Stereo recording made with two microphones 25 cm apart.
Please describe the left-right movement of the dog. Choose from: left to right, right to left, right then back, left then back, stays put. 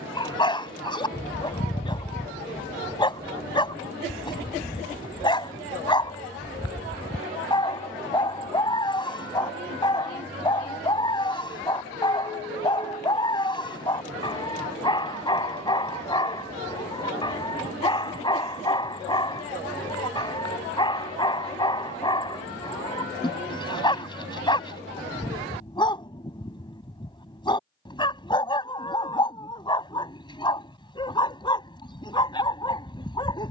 stays put.